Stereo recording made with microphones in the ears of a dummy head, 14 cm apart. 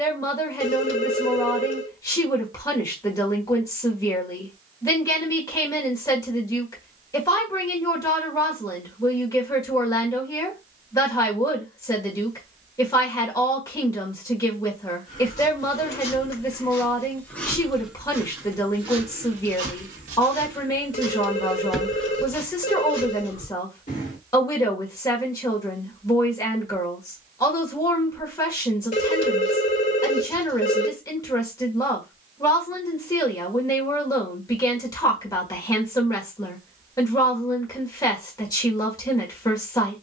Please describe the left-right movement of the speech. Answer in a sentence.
In this clip you hear the speech stay put.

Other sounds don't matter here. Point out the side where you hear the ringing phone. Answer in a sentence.
In this clip you hear the ringing phone on the left.